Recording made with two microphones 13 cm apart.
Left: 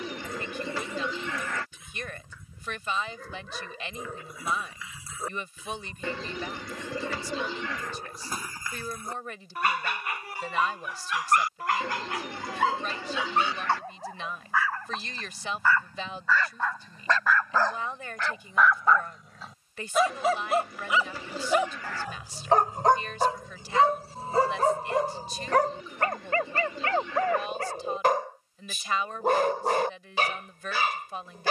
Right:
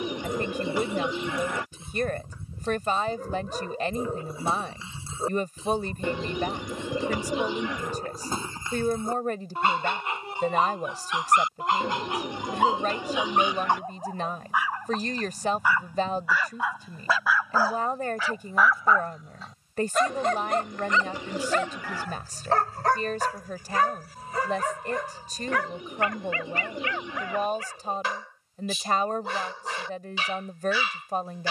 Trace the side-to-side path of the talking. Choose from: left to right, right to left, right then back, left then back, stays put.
stays put.